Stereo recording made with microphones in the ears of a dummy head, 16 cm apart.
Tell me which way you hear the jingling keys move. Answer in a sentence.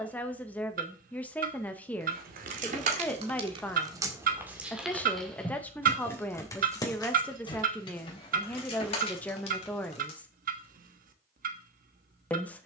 You can hear the jingling keys travel towards the left.